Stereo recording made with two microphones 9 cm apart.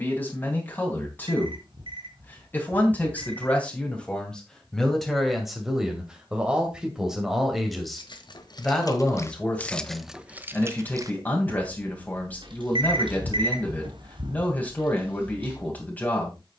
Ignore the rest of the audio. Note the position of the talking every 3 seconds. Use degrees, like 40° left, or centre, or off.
20° left, 10° left, centre, 20° left, 20° left, 20° left.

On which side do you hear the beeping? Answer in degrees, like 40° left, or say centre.
60° right.